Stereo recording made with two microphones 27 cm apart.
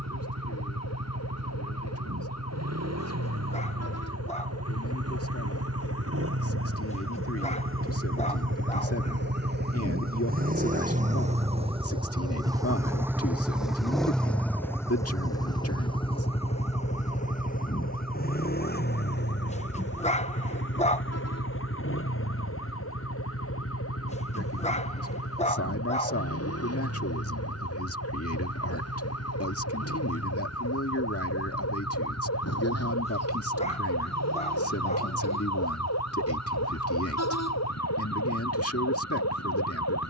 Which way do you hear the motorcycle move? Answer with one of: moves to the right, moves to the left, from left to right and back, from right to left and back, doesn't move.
moves to the left.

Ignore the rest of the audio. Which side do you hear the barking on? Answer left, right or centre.
left.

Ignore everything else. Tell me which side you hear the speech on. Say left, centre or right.
left.